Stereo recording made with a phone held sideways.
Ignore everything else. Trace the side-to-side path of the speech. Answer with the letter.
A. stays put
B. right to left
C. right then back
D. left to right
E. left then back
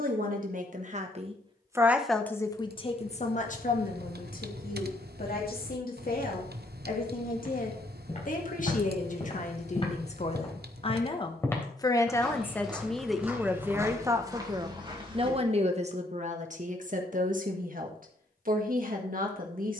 E.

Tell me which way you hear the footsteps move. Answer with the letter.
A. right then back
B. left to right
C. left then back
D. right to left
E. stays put
B.